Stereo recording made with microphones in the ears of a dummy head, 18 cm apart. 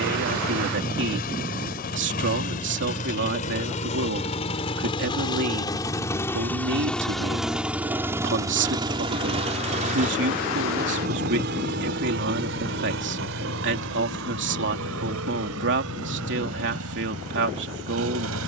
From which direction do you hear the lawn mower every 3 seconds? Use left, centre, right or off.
left, left, centre, right, right, right.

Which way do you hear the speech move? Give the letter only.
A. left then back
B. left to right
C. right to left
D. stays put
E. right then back
D.